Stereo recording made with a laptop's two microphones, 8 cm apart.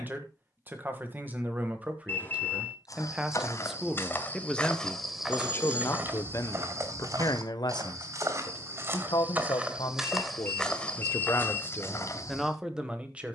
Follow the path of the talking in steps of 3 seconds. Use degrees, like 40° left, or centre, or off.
20° right, 10° left, 50° left, 60° left, 10° right.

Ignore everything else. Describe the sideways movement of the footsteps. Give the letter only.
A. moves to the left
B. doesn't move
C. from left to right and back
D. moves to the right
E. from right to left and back
C.